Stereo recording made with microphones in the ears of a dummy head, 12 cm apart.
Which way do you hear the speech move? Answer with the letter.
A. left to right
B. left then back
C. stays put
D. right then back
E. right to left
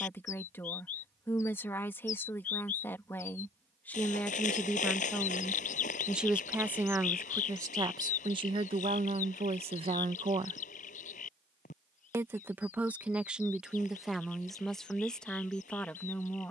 D.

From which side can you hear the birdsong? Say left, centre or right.
left.